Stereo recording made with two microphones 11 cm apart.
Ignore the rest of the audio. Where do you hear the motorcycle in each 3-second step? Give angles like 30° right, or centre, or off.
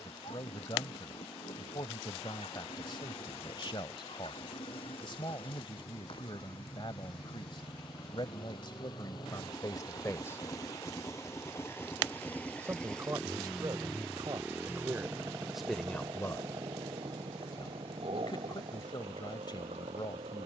60° left, 60° left, 50° left, 30° left, centre, 40° right, 60° right.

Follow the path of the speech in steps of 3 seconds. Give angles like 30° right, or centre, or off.
50° left, 50° left, 50° left, 30° left, 30° right, 10° left, 40° left.